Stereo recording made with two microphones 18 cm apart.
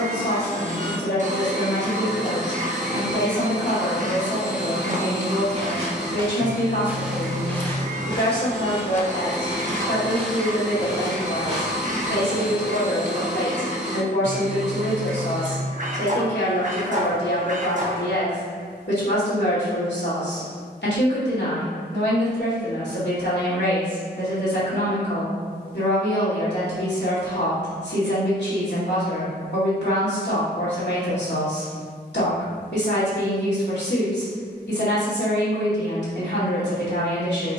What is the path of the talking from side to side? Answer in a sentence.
In this clip you hear the talking stay in one place.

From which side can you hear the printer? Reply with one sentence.
You can hear the printer on the right.